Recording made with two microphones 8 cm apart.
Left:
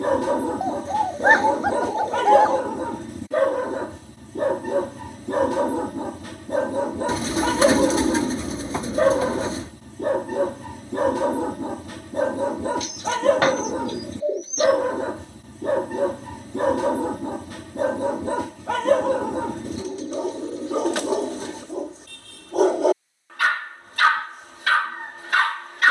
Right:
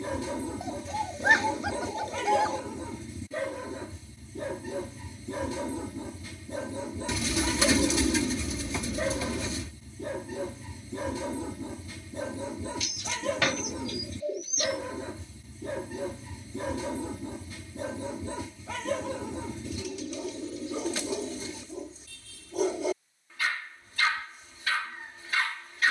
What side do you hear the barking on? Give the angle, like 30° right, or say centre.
70° left.